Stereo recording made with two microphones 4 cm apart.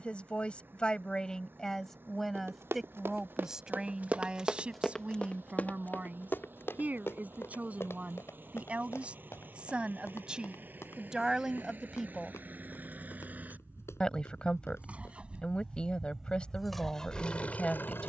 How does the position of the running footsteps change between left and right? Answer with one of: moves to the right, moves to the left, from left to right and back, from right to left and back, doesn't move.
moves to the left.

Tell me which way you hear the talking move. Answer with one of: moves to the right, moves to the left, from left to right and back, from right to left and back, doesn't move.
from left to right and back.